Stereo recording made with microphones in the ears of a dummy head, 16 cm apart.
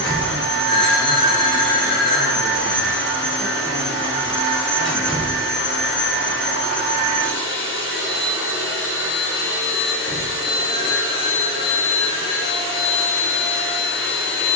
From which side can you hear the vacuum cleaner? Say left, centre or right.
left.